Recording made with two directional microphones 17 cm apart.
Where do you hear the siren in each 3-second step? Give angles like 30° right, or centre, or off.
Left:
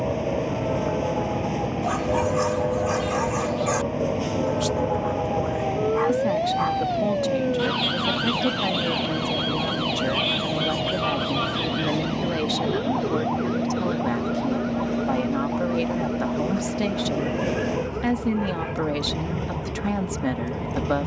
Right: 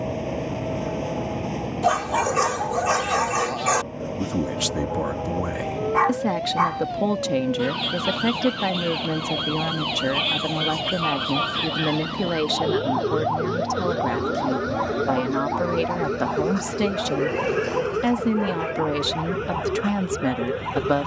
60° left, 50° left, 20° left, 10° right, 40° right, 60° right, 70° right.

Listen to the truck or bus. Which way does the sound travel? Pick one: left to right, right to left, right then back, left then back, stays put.
stays put.